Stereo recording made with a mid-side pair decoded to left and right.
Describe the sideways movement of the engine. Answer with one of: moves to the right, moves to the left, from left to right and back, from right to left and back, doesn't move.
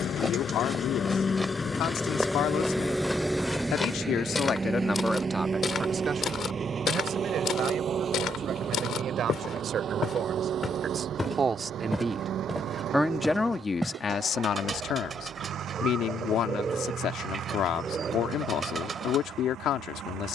moves to the right.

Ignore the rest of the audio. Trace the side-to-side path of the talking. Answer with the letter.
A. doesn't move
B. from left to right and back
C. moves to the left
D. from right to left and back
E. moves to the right
B.